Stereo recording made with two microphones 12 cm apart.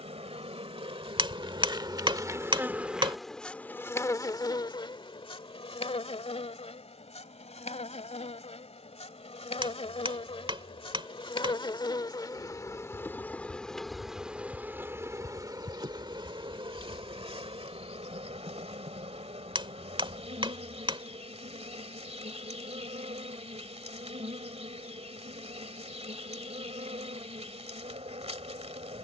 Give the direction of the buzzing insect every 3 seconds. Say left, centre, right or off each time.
right, left, left, left, centre, right, right, right, right, right.